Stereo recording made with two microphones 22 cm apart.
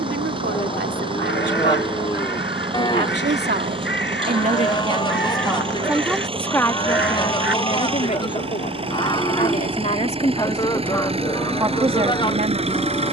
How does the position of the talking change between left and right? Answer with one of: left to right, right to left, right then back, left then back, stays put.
left then back.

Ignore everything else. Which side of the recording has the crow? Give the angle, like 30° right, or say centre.
60° left.